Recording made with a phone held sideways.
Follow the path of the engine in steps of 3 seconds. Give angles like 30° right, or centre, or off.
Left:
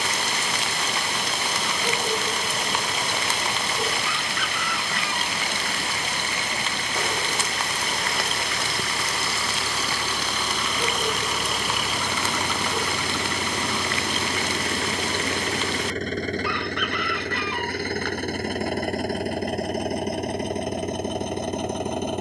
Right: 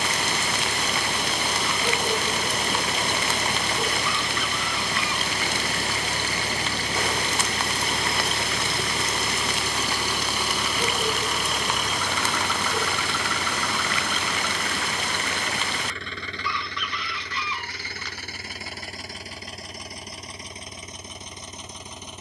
60° right, 50° right, 30° right, 10° right, 20° left, 50° left, 60° left, 70° left.